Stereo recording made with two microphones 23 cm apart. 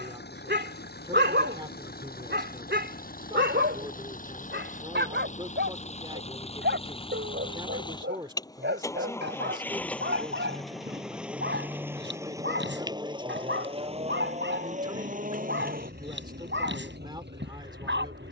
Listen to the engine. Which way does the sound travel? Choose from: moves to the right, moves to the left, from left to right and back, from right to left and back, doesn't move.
moves to the right.